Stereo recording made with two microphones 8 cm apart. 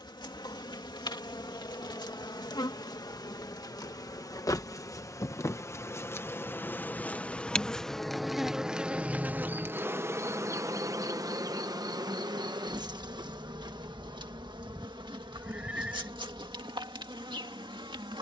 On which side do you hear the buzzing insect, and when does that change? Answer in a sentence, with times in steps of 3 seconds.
In this clip you hear the buzzing insect on the left from 0 s, in the centre from 6 s and on the right from 9 s.